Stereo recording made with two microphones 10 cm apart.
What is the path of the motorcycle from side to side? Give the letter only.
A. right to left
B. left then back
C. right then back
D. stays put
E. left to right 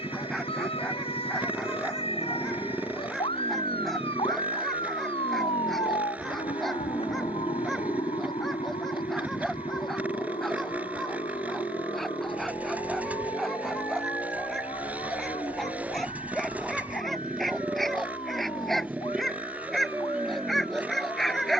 D.